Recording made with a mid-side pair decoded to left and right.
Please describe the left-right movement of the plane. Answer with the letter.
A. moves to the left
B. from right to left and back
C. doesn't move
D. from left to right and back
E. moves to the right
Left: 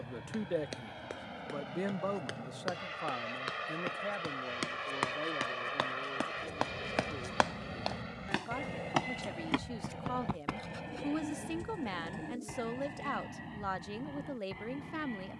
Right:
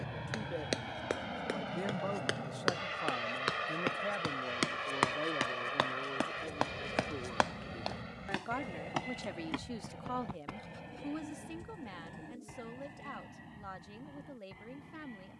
A.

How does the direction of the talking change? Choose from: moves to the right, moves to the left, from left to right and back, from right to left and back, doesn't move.
from left to right and back.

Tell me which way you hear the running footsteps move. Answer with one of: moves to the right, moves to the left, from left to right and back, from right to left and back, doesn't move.
moves to the left.